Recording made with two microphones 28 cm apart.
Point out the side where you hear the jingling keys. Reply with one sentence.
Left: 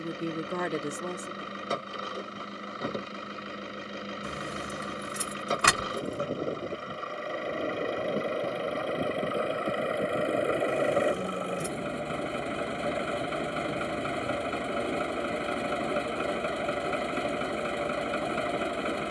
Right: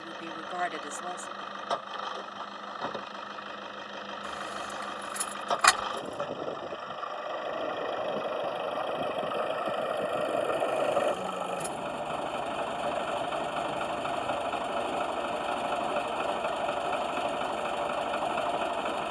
You can hear the jingling keys on the left.